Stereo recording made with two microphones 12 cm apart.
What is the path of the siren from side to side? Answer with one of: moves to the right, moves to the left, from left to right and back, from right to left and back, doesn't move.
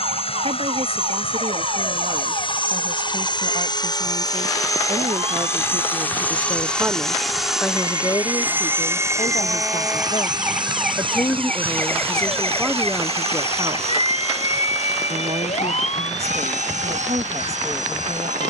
moves to the left.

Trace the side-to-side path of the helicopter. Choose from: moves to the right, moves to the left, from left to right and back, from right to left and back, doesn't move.
moves to the right.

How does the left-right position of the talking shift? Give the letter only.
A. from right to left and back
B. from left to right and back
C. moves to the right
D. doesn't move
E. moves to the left
A.